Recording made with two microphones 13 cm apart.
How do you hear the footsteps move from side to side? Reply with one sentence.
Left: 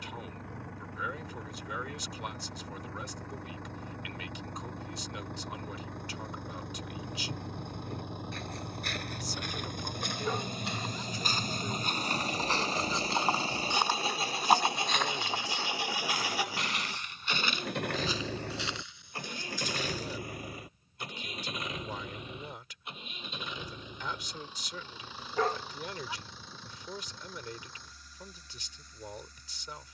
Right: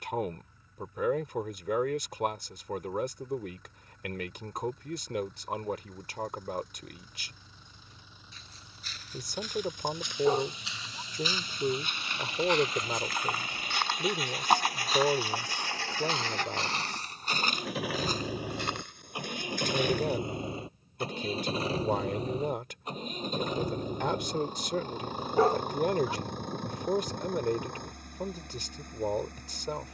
In this clip you hear the footsteps travel towards the right.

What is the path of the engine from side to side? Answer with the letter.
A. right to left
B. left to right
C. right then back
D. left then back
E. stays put
B.